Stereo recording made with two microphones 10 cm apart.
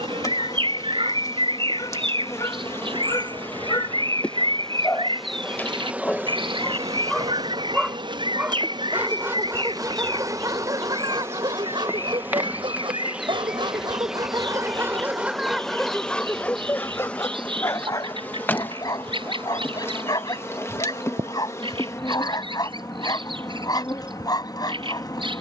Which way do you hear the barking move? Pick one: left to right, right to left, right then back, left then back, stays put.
right then back.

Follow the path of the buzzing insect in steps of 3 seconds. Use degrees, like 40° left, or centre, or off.
30° left, 10° left, 40° right, 30° right, 10° right, 10° left, 20° left, 30° left, 30° left.